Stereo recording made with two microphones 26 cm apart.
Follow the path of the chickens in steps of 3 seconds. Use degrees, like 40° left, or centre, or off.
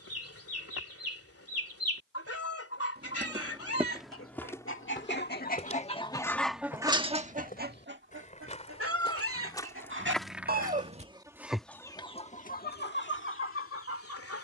60° left, 50° left, 20° right, 30° right, 50° left.